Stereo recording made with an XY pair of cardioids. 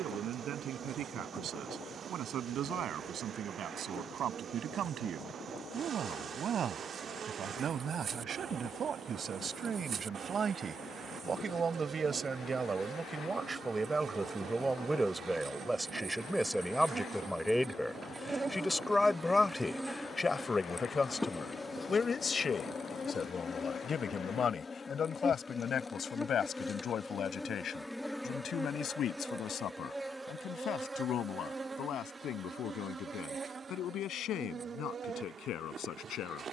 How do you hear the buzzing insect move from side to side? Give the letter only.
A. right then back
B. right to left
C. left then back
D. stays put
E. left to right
C.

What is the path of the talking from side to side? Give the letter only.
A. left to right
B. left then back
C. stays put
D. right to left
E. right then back
D.